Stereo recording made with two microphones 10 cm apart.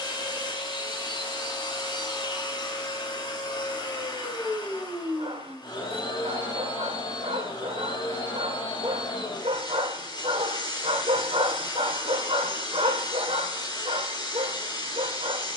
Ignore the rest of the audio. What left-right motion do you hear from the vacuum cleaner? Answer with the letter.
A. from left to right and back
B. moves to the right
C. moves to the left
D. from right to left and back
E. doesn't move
E.